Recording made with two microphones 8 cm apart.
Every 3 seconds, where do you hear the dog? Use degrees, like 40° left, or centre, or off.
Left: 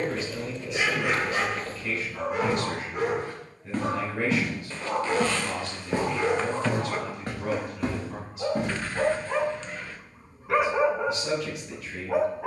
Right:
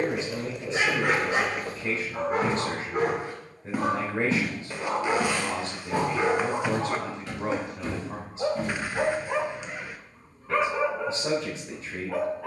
50° right, 40° right, 30° right, 10° left.